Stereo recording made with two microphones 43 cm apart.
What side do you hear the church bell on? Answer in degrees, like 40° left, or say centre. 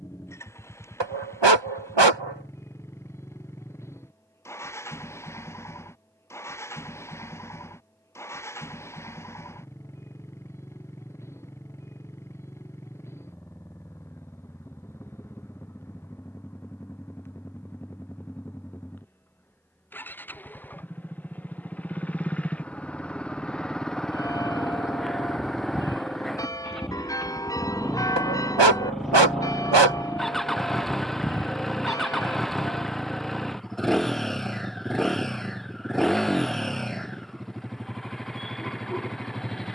10° left.